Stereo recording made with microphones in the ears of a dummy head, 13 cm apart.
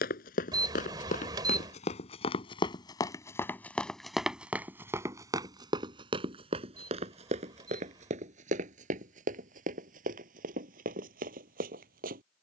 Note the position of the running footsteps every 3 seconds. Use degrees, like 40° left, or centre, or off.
50° left, 10° right, 50° right, 60° right.